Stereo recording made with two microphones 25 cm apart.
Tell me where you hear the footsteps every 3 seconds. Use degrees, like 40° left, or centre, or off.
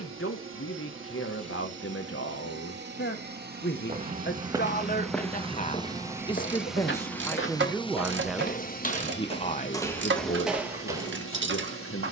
off, centre, 40° left, centre.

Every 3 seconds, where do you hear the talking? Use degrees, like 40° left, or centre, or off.
60° left, 40° left, 10° left, 40° left.